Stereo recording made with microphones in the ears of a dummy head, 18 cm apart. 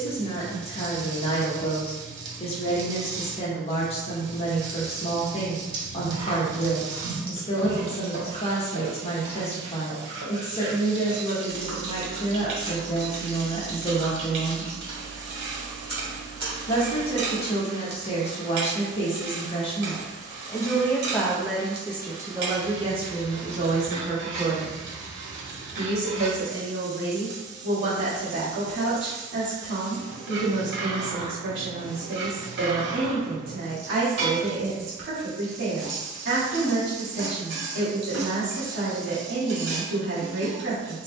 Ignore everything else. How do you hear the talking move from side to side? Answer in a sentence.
In this clip you hear the talking go from the left side to the right.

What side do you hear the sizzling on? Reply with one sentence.
In this clip you hear the sizzling on the right.